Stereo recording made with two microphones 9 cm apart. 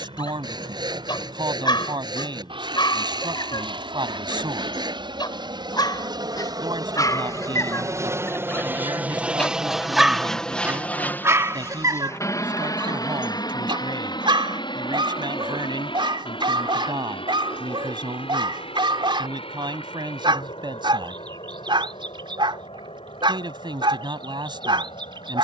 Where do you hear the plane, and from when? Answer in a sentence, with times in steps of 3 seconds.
In this clip you hear the plane on the right from 0 s, in the centre from 9 s and on the left from 12 s.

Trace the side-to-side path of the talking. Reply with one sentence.
You can hear the talking stay put.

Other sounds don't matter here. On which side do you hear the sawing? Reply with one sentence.
You can hear the sawing on the right.